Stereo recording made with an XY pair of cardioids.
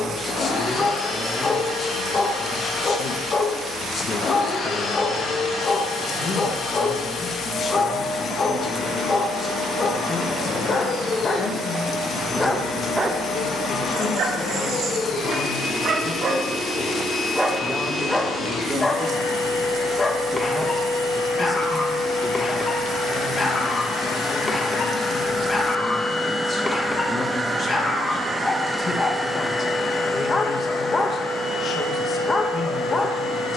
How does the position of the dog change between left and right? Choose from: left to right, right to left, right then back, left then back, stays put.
right then back.